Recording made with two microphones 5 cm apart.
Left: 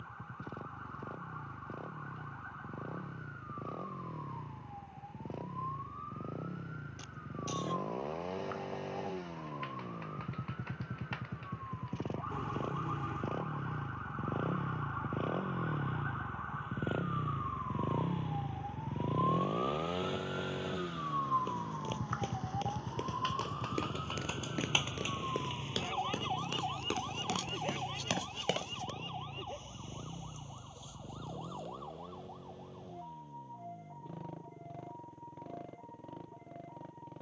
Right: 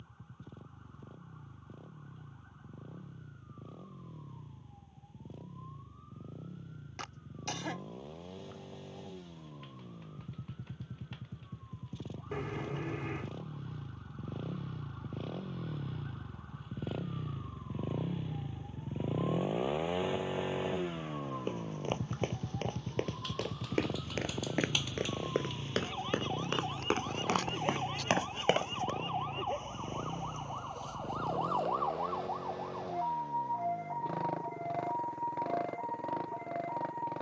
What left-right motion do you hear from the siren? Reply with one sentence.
You can hear the siren go from the left side to the right.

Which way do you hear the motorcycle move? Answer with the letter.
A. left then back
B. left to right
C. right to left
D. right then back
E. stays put
B.